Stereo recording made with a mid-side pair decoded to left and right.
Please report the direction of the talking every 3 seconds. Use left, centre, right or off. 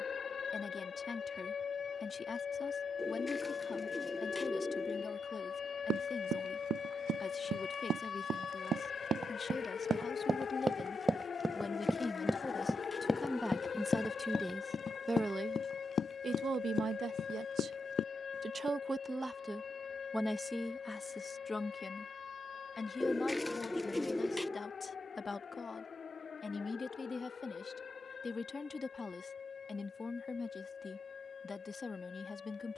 left, left, left, left, centre, right, centre, left, left, left, left.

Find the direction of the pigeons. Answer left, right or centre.
centre.